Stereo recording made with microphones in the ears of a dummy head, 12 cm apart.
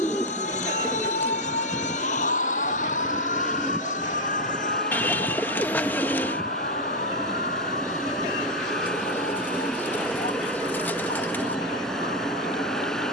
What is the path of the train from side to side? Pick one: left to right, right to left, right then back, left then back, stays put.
stays put.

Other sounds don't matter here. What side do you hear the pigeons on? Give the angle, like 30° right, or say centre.
10° left.